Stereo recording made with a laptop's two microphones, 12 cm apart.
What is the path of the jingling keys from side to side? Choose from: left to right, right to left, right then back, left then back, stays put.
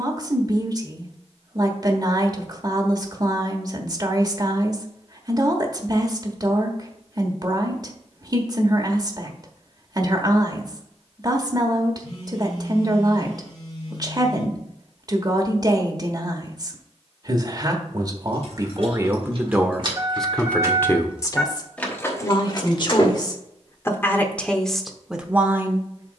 right to left.